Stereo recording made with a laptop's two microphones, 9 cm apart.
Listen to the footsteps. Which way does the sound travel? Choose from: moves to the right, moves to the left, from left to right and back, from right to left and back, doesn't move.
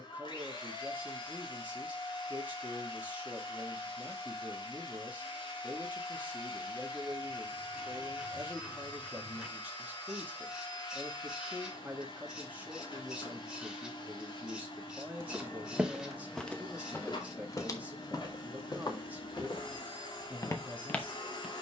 from right to left and back.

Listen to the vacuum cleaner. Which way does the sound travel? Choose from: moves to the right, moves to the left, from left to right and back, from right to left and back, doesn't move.
doesn't move.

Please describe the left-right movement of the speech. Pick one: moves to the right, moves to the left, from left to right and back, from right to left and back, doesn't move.
doesn't move.